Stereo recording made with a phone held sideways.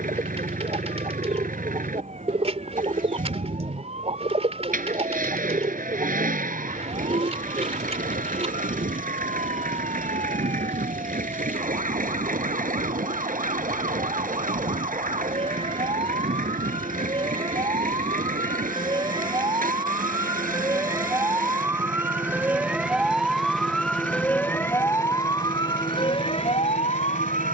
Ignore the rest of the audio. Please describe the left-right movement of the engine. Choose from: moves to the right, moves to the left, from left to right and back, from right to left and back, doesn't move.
doesn't move.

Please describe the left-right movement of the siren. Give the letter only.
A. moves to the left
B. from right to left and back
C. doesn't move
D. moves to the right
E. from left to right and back
A.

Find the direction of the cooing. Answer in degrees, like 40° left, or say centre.
40° right.